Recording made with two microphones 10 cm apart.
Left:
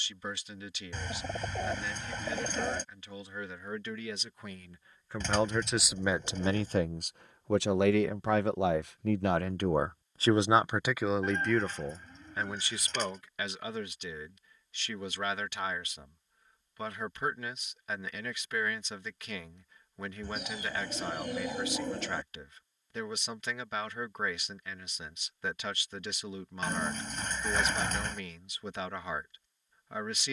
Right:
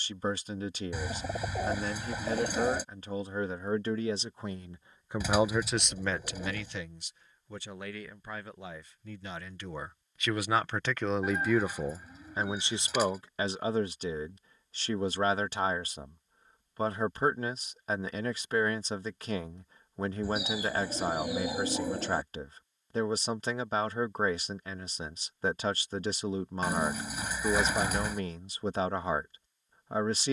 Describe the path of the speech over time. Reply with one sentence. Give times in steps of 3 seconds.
In this clip you hear the speech on the right from 0 s, on the left from 6 s and on the right from 12 s.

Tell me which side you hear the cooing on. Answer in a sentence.
You can hear the cooing in the centre.